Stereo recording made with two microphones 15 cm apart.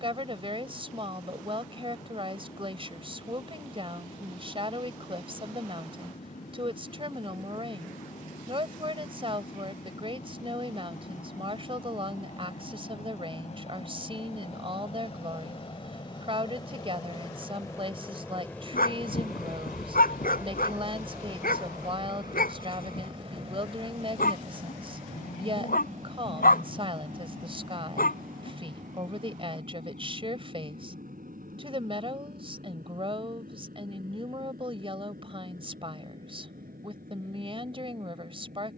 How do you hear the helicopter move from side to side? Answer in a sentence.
In this clip you hear the helicopter go from the left side to the right.